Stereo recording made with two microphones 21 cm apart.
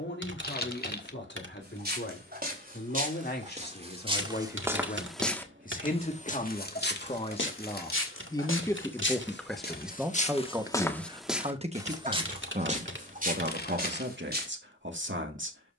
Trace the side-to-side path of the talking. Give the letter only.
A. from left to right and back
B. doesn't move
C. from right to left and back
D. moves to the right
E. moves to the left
D.